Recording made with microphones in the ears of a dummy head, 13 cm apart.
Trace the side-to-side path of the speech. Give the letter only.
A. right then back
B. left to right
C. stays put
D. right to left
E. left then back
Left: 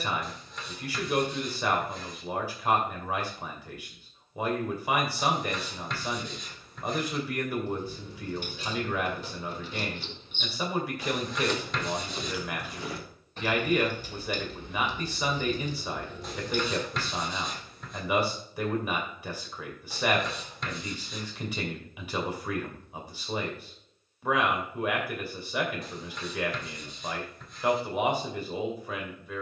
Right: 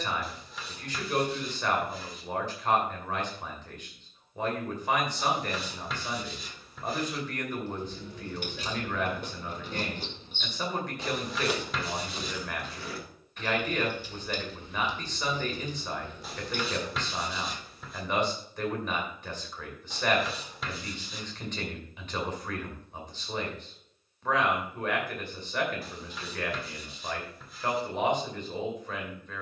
C.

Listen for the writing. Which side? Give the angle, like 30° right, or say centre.
centre.